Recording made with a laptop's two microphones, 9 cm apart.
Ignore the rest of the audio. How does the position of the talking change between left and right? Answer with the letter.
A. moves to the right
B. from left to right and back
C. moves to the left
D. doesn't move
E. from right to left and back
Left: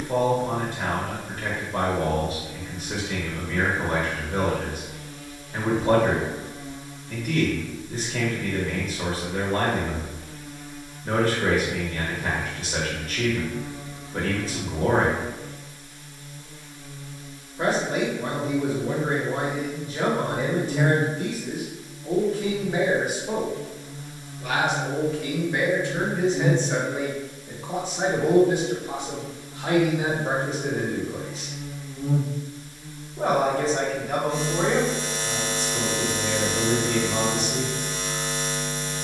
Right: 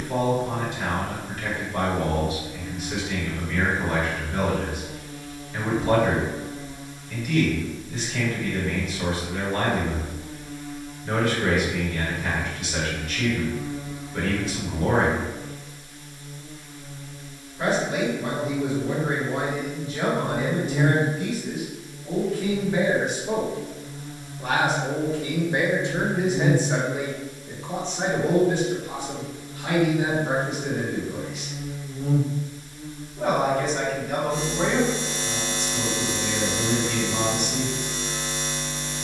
B.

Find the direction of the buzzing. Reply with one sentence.
In this clip you hear the buzzing on the right.